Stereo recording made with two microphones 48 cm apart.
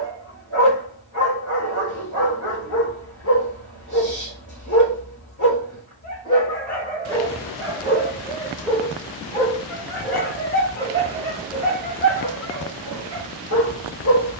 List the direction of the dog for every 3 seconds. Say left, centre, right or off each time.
left, left, centre, left, left.